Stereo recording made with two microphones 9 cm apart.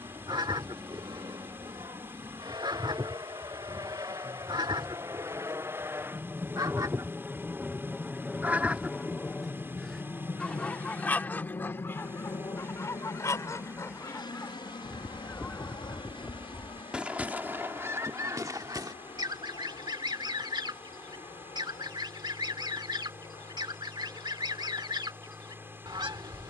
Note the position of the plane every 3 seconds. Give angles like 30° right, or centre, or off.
60° right, 40° right, 10° right, 30° left, 50° left, 60° left, 60° left, 70° left, 70° left.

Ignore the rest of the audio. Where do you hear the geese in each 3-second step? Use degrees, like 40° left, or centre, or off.
60° right, 60° right, 30° right, 10° left, 30° left, centre, 50° right, 60° right, 60° right.